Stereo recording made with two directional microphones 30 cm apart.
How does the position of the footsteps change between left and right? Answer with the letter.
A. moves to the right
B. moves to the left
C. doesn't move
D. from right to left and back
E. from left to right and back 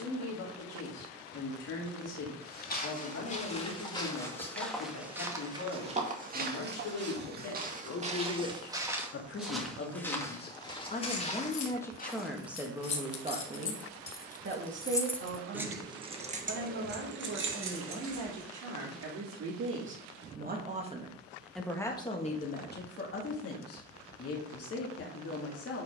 E.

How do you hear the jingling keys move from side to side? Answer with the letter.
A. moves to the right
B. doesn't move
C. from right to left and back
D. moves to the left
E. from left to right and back
A.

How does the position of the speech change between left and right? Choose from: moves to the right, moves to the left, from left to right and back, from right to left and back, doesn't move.
from left to right and back.